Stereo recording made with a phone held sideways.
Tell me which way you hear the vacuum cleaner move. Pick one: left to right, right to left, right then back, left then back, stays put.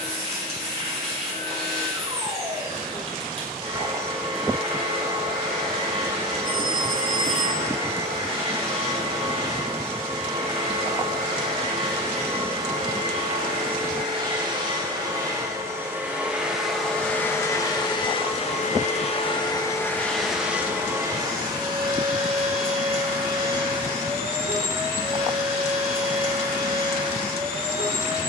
left then back.